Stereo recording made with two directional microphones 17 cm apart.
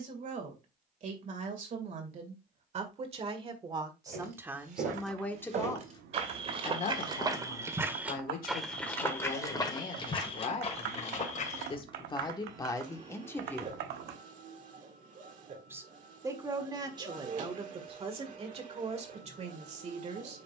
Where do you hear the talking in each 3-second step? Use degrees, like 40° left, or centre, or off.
50° right, 10° right, 50° left, 40° left, 20° left, 30° right, 40° right.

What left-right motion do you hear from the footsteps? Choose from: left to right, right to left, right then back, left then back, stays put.
right to left.